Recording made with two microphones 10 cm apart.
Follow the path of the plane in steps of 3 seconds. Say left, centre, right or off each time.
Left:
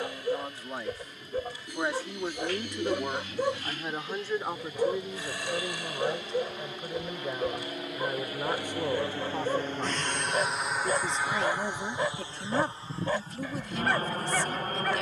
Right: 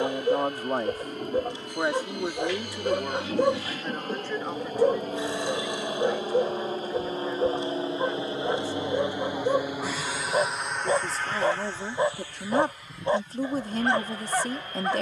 right, right, right, centre, left.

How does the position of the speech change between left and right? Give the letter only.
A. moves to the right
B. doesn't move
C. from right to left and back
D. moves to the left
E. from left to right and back
C.